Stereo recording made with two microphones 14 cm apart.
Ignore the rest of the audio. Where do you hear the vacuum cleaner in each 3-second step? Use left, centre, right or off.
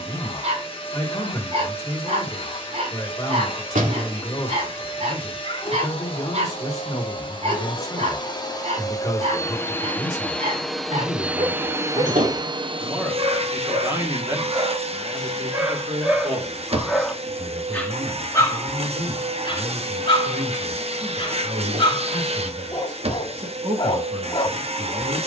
left, left, left, centre, right, right, right, right, right.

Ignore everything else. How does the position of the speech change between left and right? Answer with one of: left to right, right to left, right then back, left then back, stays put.
left to right.